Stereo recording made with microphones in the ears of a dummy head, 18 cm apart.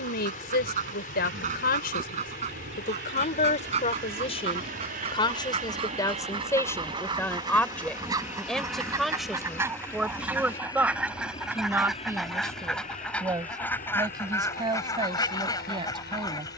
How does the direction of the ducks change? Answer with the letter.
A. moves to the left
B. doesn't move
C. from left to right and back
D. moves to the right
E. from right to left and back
A.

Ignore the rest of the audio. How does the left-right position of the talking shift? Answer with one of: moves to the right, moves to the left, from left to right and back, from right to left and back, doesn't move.
moves to the right.